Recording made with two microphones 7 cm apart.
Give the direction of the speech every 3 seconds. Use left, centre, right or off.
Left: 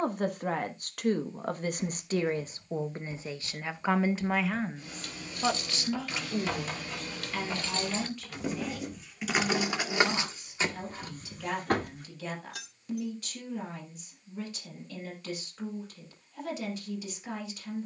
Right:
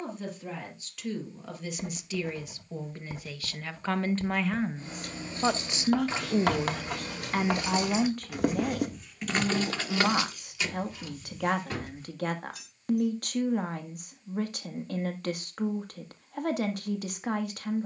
left, centre, right, right, right, right.